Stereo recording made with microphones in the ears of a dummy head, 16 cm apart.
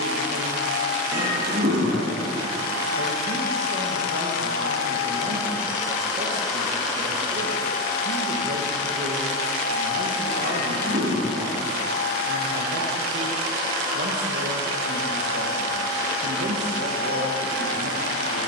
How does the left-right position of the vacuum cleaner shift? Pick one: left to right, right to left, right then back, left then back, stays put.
left then back.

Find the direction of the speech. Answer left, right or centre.
right.